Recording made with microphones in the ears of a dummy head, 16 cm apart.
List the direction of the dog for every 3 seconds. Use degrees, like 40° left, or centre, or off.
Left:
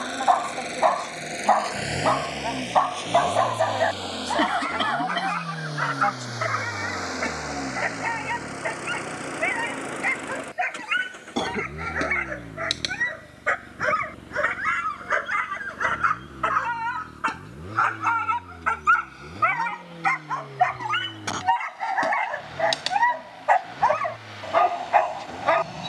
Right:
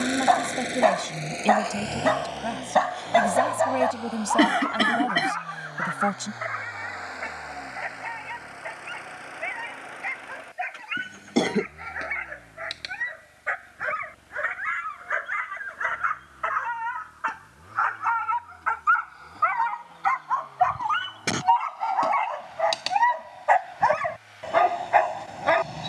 30° right, 20° left, 60° left, 60° left, 60° left, 50° left, 30° left, 10° left, centre.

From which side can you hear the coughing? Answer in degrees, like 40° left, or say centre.
30° right.